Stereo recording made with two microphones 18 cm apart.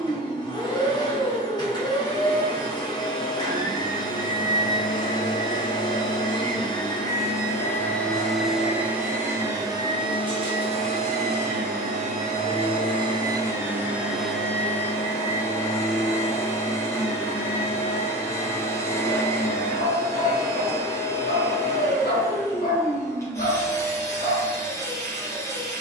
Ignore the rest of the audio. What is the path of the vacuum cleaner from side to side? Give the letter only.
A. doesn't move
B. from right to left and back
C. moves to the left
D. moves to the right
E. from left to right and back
E.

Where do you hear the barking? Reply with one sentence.
You can hear the barking on the left.